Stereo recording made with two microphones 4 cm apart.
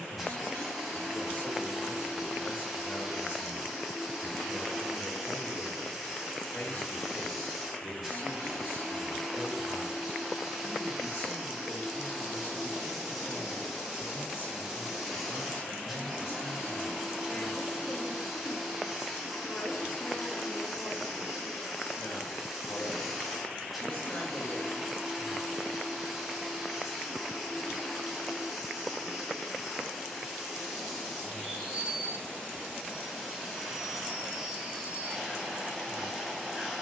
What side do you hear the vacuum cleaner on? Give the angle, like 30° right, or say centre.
10° right.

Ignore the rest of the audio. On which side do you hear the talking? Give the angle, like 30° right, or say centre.
60° left.